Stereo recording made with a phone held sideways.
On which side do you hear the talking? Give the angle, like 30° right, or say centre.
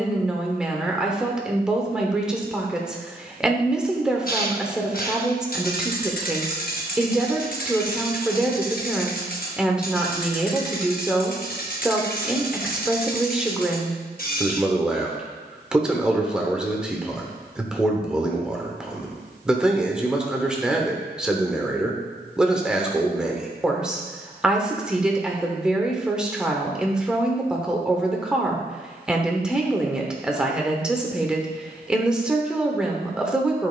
10° right.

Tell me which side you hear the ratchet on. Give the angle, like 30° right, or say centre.
60° left.